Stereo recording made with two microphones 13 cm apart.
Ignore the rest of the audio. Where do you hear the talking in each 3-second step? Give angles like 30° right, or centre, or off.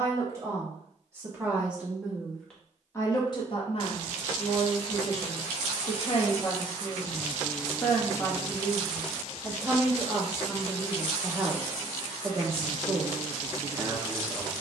10° right, 50° left, 20° left, 10° right, 20° right.